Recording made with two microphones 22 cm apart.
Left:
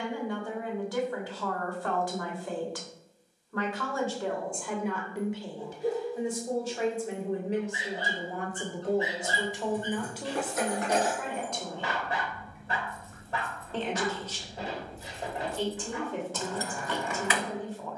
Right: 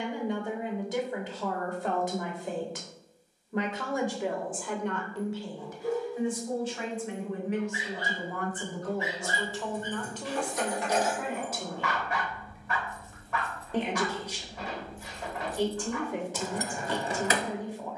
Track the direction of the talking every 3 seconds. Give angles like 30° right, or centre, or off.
20° right, centre, 40° left, 10° left, 10° right, 10° right.